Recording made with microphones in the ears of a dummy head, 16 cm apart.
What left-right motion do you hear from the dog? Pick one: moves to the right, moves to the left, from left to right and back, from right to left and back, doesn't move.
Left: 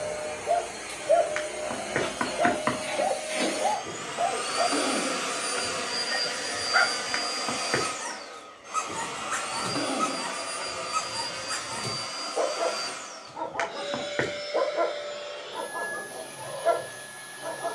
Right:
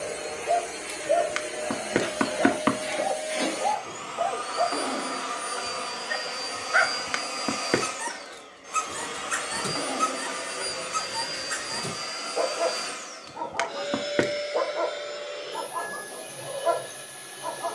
from left to right and back.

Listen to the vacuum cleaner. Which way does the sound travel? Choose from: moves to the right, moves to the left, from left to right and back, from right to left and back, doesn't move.
from right to left and back.